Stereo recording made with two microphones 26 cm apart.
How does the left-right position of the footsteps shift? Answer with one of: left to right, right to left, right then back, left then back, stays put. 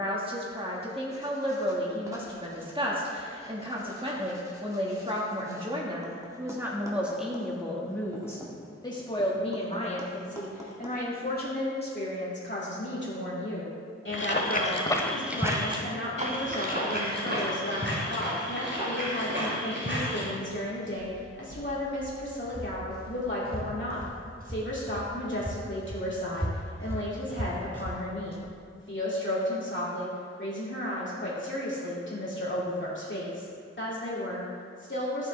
right then back.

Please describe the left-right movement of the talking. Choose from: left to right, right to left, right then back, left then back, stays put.
right to left.